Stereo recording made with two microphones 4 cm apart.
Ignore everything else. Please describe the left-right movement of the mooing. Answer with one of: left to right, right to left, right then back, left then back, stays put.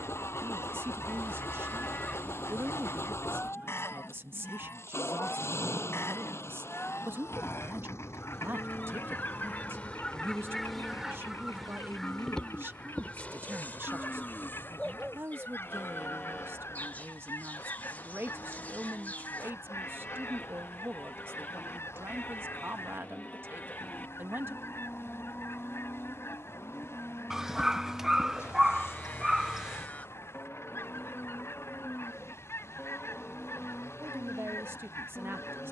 stays put.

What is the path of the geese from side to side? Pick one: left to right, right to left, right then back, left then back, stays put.
right then back.